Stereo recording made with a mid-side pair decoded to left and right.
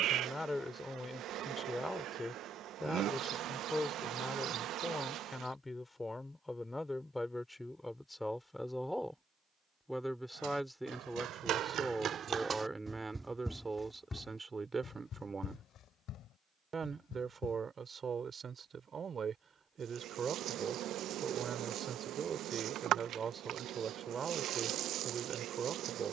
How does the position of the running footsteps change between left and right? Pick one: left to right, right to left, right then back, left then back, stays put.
right to left.